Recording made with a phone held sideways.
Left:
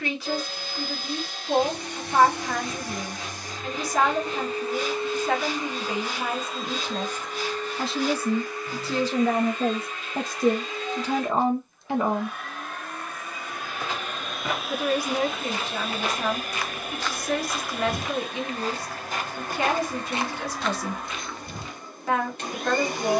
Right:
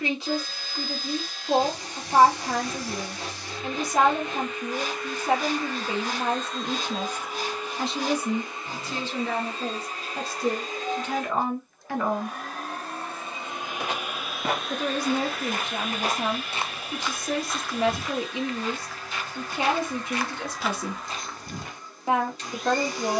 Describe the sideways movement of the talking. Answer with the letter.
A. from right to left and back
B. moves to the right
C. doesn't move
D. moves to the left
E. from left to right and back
A.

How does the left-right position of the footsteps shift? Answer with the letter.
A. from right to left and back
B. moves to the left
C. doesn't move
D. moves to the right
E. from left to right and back
A.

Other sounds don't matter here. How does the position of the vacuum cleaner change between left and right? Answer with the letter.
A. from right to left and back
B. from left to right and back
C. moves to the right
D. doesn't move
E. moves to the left
B.